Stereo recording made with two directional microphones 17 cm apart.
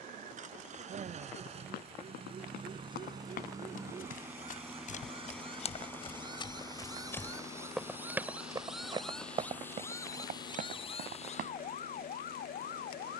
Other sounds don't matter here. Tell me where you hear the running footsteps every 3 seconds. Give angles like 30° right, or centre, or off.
60° left, 50° left, 10° left, 50° right, off.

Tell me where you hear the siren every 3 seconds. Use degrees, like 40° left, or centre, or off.
40° right, 40° right, 20° right, 30° left, 60° left.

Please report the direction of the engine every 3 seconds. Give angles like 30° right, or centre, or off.
40° right, 10° right, 30° left, 50° left, 60° left.